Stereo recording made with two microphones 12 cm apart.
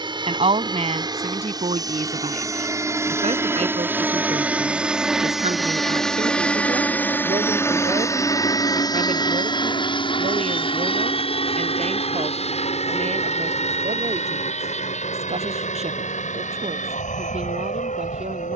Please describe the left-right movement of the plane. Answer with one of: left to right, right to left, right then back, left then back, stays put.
right to left.